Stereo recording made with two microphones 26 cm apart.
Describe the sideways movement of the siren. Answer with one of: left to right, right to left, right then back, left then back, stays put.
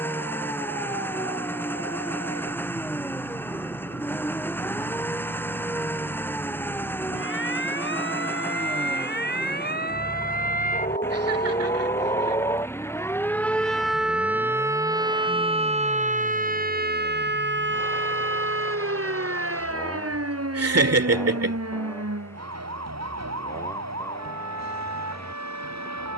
left to right.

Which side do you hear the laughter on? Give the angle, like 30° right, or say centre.
70° right.